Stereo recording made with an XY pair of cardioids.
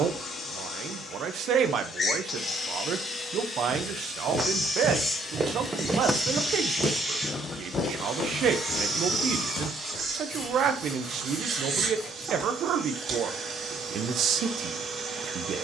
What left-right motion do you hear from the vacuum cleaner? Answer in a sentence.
In this clip you hear the vacuum cleaner move to the right.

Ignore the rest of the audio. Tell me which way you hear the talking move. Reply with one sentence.
You can hear the talking stay in one place.